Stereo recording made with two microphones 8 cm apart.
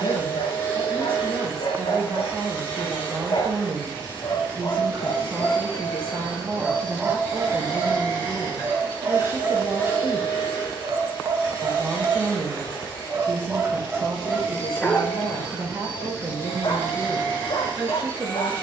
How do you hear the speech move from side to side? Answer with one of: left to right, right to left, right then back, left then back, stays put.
stays put.